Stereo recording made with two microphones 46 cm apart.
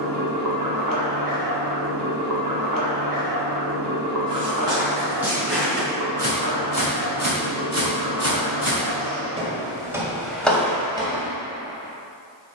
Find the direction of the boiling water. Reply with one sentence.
You can hear the boiling water on the right.